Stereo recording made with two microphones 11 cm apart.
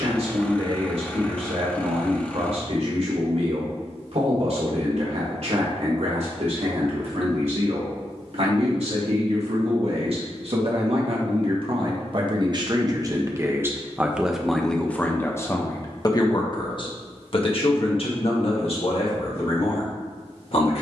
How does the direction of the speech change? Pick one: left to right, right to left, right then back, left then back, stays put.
right to left.